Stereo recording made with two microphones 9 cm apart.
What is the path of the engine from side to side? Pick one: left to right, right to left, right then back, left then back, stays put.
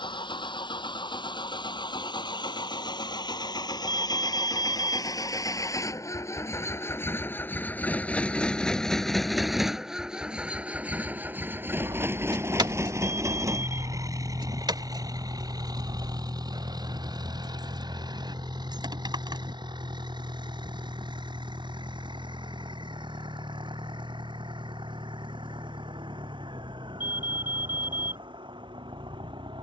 left to right.